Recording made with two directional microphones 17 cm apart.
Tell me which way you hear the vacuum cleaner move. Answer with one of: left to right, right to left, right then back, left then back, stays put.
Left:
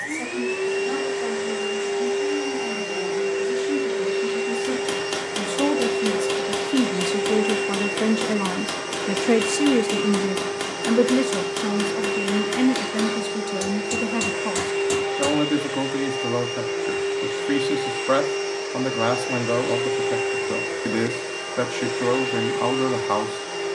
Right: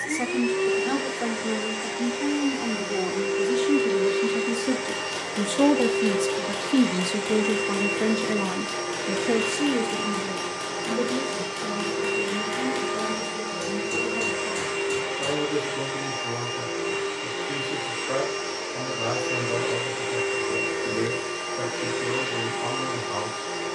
stays put.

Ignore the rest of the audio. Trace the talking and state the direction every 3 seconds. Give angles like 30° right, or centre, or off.
40° right, 30° right, centre, 50° left, 70° left, 70° left, 70° left, 70° left.